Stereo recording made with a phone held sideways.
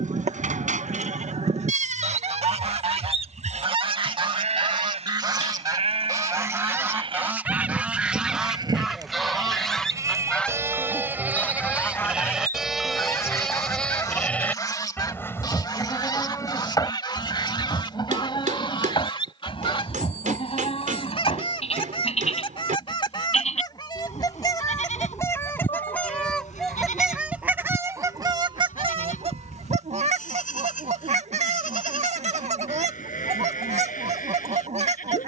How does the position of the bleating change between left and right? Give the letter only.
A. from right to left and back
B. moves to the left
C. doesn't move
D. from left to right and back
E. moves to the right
B.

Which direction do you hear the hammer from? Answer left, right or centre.
right.